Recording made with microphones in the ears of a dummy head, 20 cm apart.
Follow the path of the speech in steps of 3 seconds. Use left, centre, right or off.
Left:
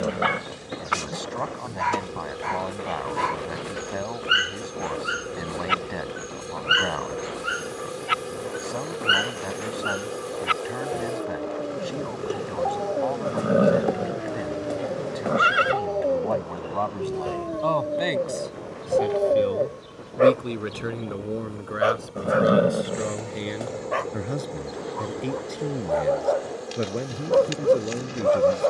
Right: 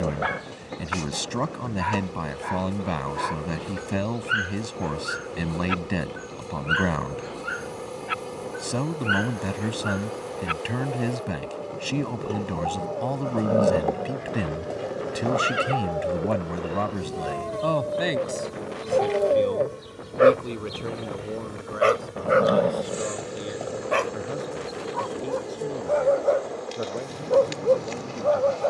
right, right, right, right, right, right, centre, left, left, left.